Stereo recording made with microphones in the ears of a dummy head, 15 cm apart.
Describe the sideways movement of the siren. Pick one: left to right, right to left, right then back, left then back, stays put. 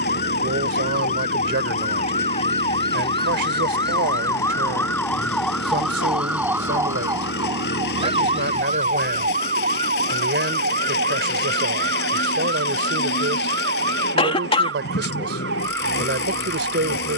left to right.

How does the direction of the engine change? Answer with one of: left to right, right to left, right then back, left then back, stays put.
stays put.